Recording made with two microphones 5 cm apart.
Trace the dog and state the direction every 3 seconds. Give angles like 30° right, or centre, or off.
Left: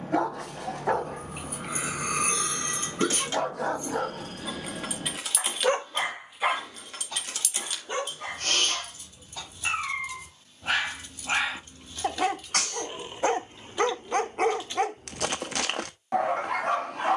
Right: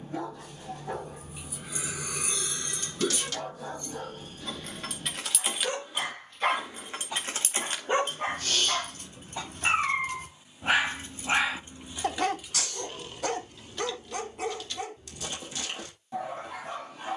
70° left, 70° left, 20° right, 10° right, 30° left, 70° left.